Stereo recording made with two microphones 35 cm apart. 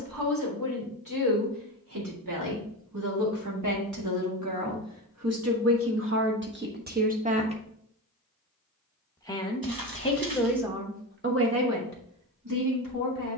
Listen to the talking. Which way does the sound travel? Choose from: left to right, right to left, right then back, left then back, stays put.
left then back.